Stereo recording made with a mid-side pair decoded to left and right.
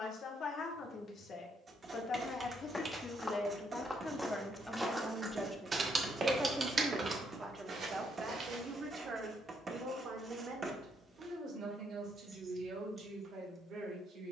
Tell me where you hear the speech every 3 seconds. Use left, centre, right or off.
left, centre, right, right, right.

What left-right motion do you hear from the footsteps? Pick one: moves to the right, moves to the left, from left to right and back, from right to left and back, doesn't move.
moves to the right.